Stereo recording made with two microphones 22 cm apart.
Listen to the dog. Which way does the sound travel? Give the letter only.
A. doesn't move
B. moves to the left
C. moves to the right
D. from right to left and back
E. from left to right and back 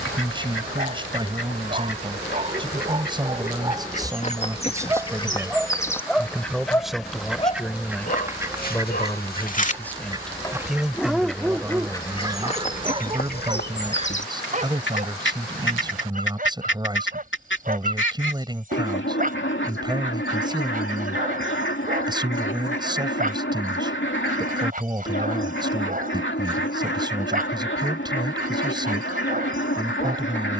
D.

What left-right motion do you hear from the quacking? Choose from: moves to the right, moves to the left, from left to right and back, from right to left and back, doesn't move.
from left to right and back.